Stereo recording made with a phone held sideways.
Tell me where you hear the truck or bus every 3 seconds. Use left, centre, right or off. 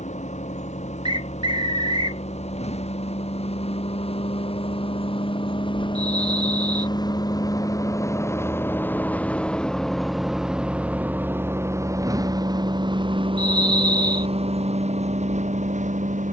left, left, left, centre, right, right.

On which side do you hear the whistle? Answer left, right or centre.
right.